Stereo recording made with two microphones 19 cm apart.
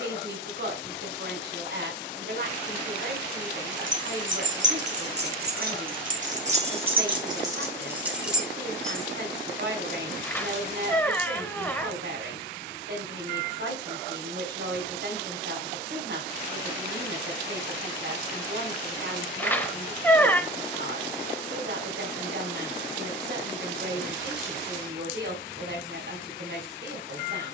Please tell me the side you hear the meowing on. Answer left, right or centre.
centre.